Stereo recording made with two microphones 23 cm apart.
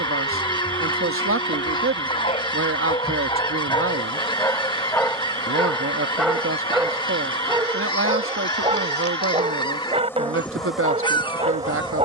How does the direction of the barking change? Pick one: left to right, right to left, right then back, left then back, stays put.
left to right.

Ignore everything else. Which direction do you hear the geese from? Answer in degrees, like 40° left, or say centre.
20° left.